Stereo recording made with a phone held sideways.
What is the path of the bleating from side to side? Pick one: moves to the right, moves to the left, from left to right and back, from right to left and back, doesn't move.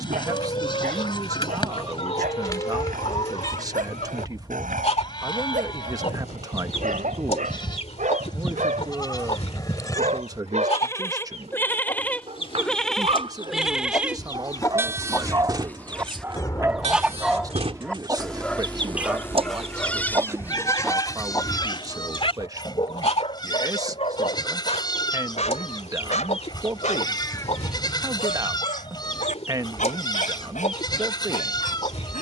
from left to right and back.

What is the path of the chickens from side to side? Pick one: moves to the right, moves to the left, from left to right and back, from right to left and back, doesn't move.
from left to right and back.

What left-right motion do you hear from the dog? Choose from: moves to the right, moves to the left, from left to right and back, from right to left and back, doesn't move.
moves to the left.